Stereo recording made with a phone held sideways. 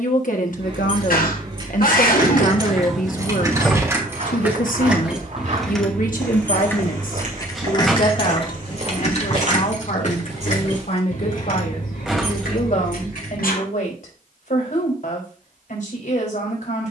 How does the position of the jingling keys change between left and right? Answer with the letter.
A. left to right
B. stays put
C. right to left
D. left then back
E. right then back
C.